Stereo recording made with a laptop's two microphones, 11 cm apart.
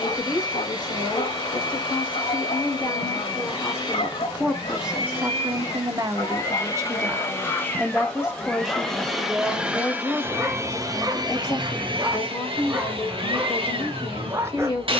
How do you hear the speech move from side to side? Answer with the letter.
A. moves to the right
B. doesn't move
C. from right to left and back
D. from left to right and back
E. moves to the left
D.